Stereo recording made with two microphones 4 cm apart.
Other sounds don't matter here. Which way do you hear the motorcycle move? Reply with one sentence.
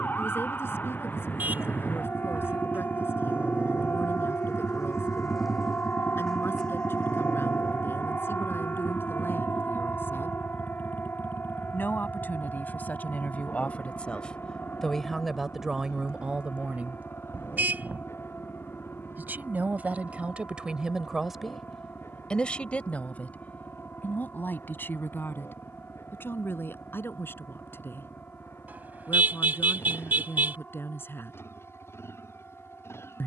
In this clip you hear the motorcycle travel towards the left.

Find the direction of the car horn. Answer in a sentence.
In this clip you hear the car horn on the right.